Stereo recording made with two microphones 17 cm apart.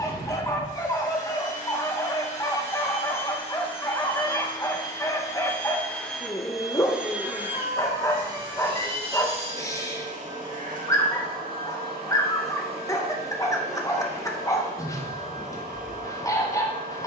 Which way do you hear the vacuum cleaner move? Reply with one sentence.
In this clip you hear the vacuum cleaner move from left to right.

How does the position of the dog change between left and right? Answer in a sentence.
In this clip you hear the dog stay put.